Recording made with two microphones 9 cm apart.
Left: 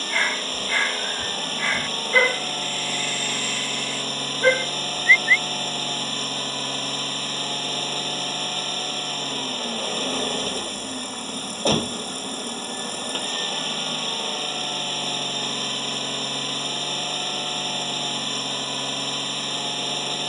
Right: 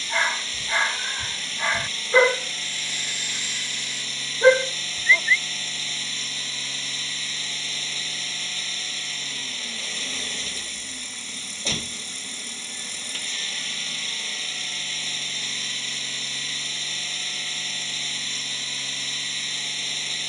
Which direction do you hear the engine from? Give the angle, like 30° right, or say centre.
50° left.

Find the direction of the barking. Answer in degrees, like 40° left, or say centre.
20° right.